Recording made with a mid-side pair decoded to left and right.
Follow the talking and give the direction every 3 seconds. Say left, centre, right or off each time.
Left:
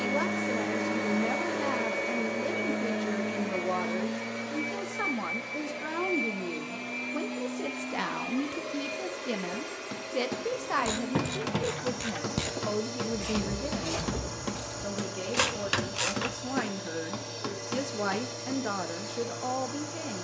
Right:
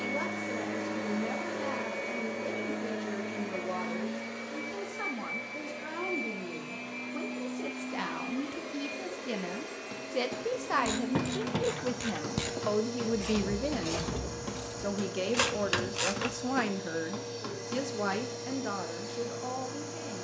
left, left, left, centre, right, right, left.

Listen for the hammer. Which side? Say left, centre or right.
left.